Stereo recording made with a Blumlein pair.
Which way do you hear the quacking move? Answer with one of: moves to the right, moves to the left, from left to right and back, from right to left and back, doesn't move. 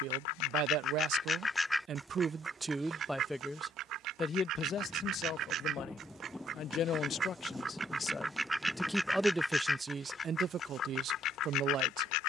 from left to right and back.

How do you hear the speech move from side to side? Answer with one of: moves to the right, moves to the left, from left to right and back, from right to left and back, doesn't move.
from right to left and back.